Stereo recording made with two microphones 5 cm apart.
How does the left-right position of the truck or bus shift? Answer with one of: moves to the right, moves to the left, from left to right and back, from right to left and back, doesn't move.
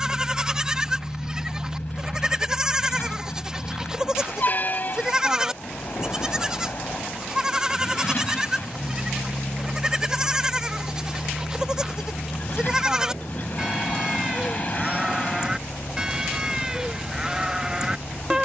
doesn't move.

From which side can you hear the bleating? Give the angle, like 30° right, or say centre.
10° right.